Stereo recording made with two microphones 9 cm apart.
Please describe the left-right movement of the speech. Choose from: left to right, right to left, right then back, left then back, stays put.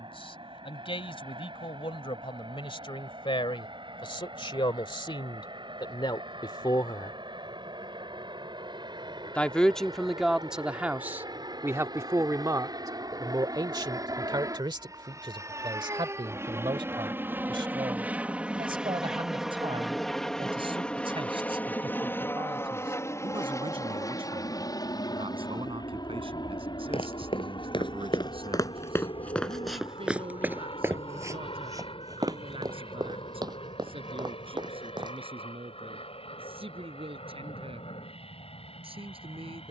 left to right.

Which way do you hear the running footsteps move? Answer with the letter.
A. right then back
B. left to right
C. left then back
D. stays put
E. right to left
B.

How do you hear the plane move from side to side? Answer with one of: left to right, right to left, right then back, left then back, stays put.
right to left.